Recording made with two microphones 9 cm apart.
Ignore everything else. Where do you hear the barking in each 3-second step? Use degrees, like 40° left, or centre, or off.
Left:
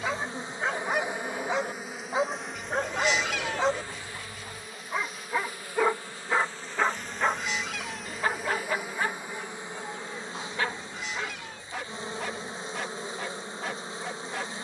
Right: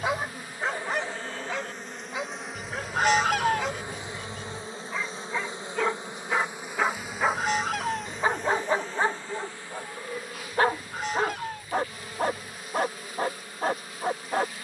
10° left, 20° left, 20° right, 40° right, 50° right.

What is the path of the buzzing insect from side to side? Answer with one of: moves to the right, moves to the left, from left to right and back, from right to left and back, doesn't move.
from left to right and back.